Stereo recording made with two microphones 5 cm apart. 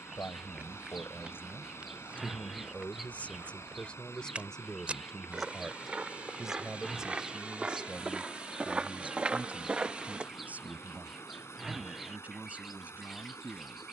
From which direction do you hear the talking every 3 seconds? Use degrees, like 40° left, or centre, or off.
50° left, 20° left, 20° right, 30° right, 30° right.